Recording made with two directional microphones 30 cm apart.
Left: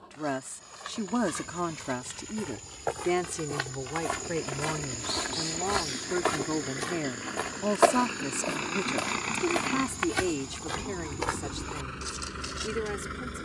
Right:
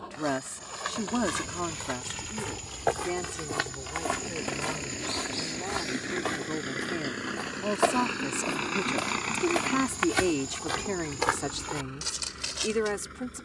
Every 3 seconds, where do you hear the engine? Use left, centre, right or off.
right, right, right, left, left.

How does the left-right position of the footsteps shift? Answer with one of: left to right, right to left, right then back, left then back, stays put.
left then back.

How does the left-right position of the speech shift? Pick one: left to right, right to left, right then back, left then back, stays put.
left then back.